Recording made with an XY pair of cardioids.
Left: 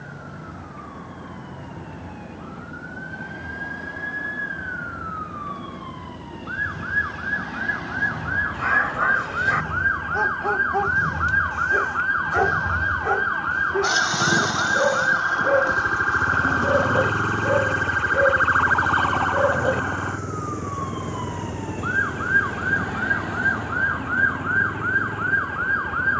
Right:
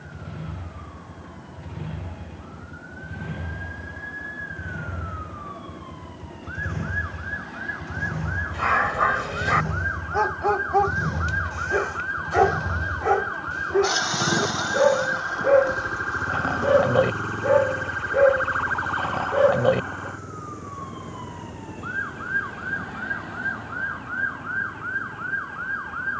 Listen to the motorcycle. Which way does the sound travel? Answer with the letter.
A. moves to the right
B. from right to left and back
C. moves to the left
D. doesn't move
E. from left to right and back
C.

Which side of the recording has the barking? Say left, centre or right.
right.